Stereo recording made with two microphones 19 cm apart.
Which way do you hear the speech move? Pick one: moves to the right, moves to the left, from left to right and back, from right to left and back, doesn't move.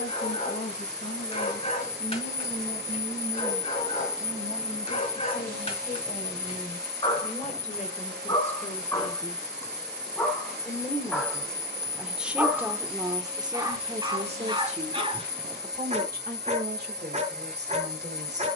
moves to the right.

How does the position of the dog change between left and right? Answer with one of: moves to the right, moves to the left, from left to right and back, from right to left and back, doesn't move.
moves to the right.